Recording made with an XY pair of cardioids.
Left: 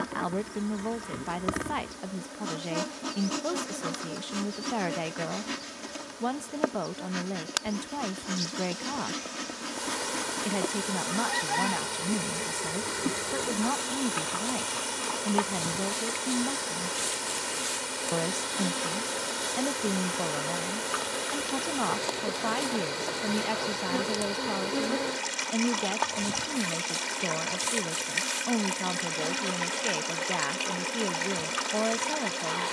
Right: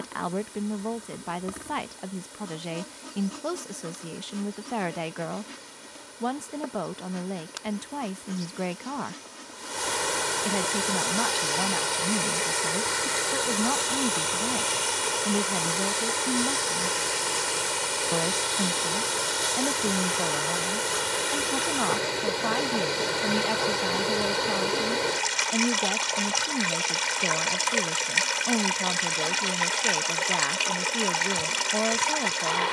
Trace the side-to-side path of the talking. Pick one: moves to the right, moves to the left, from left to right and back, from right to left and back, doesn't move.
doesn't move.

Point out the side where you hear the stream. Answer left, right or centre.
right.